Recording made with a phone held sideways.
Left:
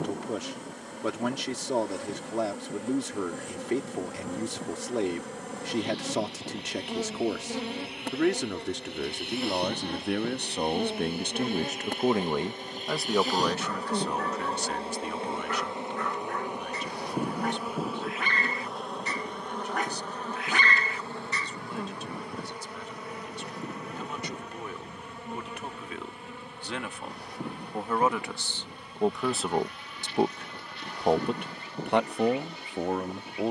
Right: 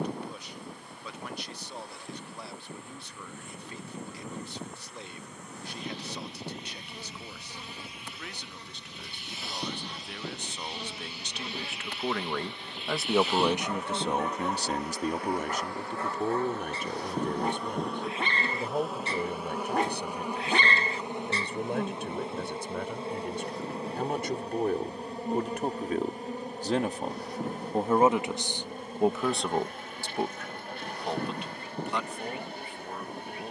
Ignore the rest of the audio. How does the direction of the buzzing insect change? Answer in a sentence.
You can hear the buzzing insect go from the left side to the right.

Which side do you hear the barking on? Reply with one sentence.
In this clip you hear the barking on the right.